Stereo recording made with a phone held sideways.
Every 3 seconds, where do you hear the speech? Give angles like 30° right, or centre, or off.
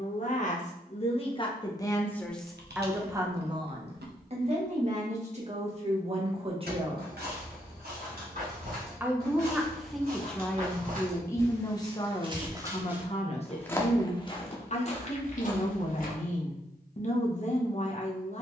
30° left, 40° right, 30° right, 10° left, 40° left, 50° left.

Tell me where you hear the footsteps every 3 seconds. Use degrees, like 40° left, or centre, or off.
off, off, 70° right, 60° right, 10° left, 50° left.